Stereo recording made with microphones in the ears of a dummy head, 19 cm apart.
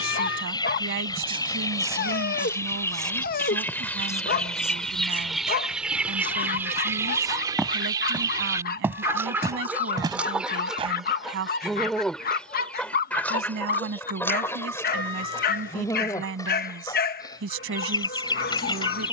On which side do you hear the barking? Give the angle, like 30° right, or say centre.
50° left.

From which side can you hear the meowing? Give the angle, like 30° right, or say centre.
60° left.